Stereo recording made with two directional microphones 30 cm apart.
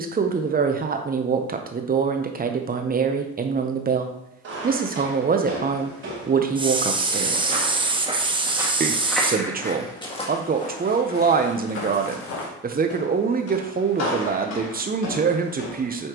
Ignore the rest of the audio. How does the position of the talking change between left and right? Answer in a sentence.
You can hear the talking stay in one place.